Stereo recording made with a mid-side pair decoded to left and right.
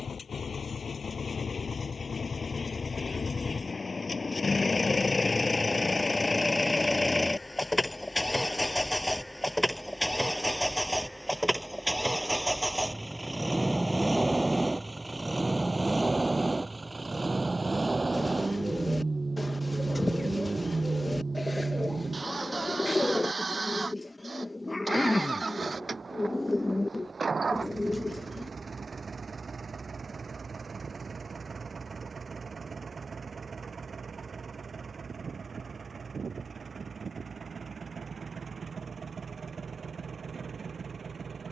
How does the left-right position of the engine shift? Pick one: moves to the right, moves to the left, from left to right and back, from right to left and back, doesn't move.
moves to the right.